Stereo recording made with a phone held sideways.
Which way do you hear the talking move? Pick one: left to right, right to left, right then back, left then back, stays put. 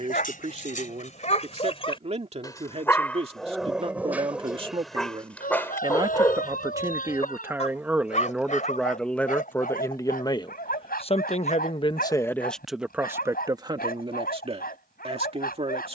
left then back.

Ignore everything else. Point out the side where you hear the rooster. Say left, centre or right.
left.